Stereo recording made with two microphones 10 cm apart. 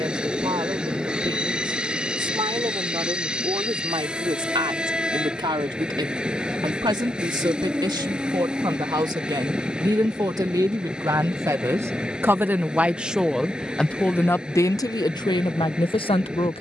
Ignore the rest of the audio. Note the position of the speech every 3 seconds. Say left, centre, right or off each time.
right, right, right, right, centre, left.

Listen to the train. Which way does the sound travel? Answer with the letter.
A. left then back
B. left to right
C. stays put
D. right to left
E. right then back
C.